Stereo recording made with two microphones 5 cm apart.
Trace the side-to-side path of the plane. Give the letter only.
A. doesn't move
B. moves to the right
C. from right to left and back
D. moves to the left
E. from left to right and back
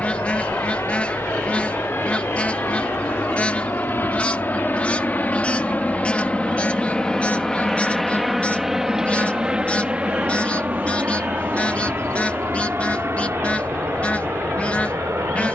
B.